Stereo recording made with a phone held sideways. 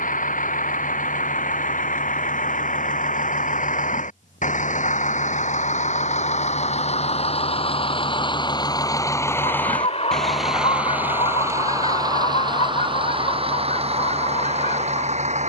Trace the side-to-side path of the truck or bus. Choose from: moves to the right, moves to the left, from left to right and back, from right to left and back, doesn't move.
moves to the right.